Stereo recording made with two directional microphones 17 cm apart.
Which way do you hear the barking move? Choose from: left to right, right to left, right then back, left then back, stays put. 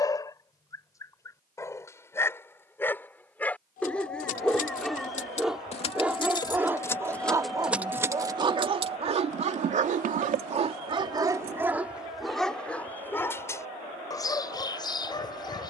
right then back.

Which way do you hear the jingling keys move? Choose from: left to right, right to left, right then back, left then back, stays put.
left to right.